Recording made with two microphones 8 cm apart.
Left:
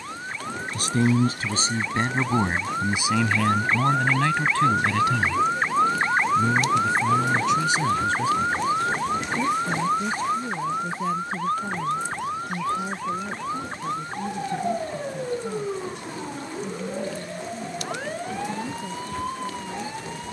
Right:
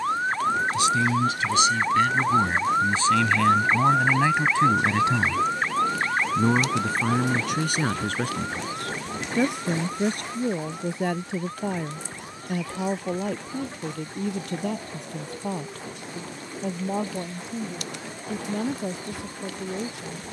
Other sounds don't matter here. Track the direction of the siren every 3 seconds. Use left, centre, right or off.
right, centre, left, left, left, left, left.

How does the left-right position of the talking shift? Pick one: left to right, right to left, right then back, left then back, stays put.
left to right.